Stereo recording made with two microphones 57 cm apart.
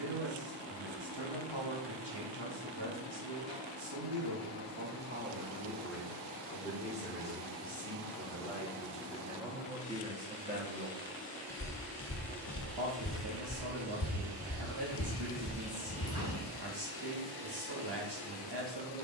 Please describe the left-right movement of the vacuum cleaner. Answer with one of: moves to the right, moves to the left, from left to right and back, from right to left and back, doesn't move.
moves to the right.